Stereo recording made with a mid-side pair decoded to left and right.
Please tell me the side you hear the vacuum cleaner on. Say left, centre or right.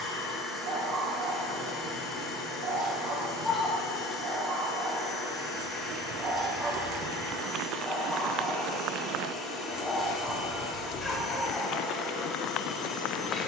left.